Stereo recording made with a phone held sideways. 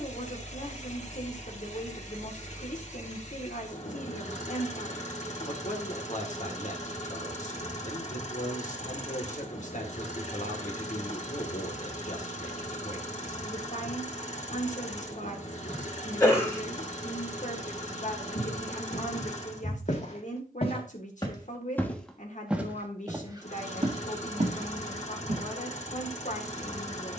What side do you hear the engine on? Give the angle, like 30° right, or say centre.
50° left.